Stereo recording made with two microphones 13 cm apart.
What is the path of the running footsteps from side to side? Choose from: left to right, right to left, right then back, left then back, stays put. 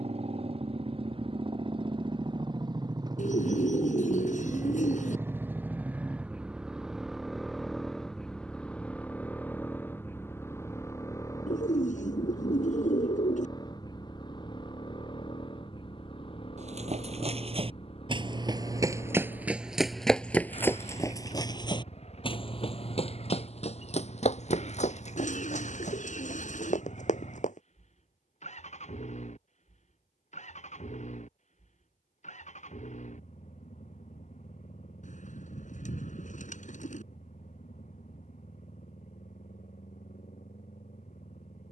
right to left.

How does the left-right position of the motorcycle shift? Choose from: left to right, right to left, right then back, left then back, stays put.
right to left.